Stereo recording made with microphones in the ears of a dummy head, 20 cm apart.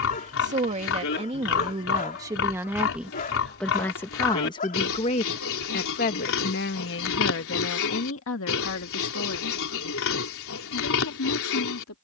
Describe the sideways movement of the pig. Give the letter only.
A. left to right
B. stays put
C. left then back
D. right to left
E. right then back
B.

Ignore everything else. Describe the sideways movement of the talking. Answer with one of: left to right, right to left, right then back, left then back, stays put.
right to left.